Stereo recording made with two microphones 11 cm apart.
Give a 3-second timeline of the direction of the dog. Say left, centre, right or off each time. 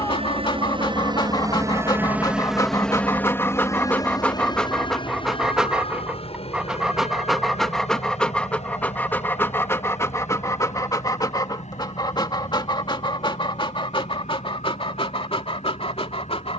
left, centre, centre, left, left, left.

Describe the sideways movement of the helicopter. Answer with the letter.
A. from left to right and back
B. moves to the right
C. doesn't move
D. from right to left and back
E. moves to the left
E.